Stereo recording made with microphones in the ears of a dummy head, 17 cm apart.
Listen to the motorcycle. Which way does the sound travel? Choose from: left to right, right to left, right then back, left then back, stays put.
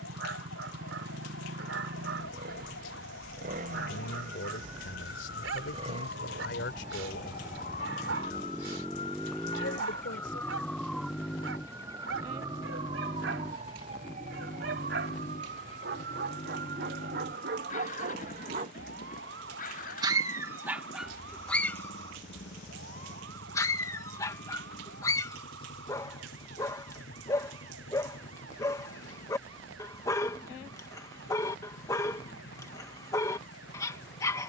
right to left.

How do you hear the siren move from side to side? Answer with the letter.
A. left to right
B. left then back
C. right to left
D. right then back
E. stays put
A.